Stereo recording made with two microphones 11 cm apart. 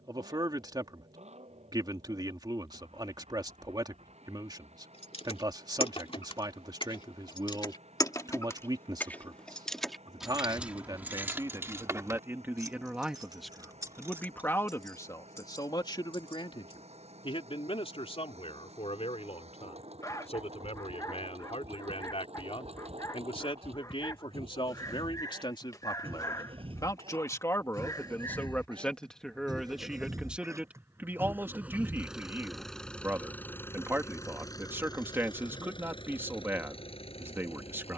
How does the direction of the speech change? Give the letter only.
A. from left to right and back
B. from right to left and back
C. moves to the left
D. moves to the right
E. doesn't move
B.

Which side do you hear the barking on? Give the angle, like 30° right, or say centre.
30° left.